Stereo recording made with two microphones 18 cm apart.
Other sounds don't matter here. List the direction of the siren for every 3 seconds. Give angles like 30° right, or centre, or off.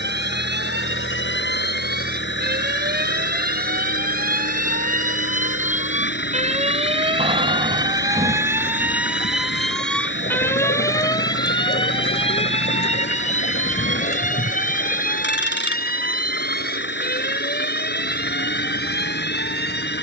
70° right, 50° right, 30° right, 10° left, 40° left, 50° left, 60° left.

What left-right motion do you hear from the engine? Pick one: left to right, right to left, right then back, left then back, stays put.
stays put.